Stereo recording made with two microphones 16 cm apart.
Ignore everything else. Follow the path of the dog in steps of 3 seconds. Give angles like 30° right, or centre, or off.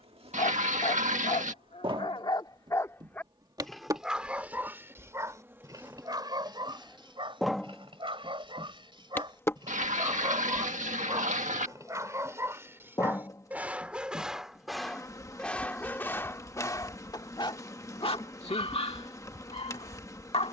40° left, 10° right, 30° right, 30° right, 10° right, 20° left, 40° left.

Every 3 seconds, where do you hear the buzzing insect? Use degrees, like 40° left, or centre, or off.
30° right, 20° right, centre, 20° left, 20° left, 20° left, 20° left.